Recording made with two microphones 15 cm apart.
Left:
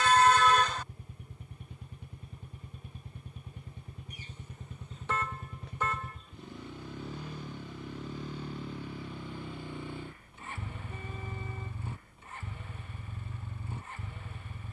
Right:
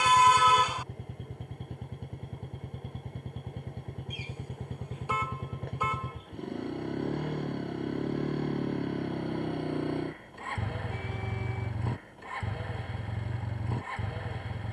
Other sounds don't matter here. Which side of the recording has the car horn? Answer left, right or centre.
centre.